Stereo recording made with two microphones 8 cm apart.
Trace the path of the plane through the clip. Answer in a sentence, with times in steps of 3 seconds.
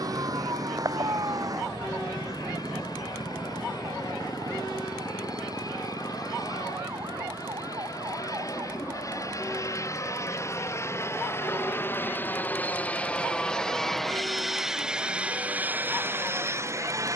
You can hear the plane on the left from 0 s, in the centre from 12 s and on the right from 15 s.